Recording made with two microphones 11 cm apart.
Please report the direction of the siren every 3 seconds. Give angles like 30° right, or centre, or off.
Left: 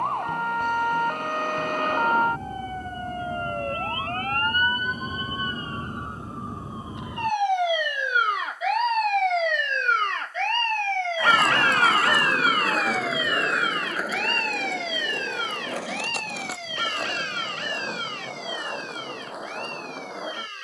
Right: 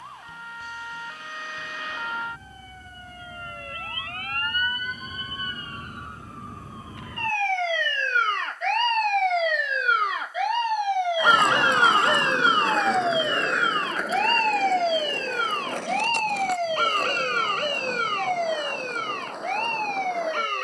50° left, 40° left, 10° left, 10° right, 30° right, 40° right, 50° right.